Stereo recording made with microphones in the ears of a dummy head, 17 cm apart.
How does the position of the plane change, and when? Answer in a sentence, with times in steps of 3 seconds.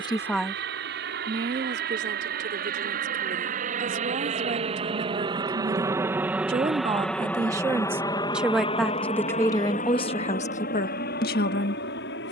In this clip you hear the plane on the right from 0 s, in the centre from 6 s and on the left from 9 s.